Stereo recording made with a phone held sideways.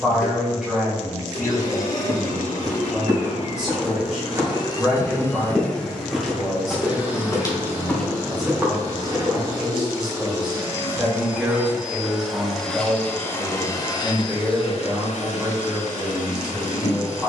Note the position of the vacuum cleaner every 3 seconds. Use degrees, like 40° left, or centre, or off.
80° left, 30° left, 20° right, 20° right, 20° left, 70° left.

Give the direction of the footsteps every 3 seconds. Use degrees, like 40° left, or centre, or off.
40° right, 20° right, centre, 30° right, off, off.